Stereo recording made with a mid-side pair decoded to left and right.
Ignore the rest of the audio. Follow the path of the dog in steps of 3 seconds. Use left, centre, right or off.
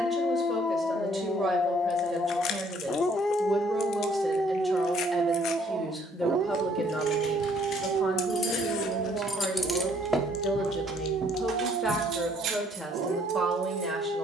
left, centre, right, right, right.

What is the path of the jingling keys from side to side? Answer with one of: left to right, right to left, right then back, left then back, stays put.
left to right.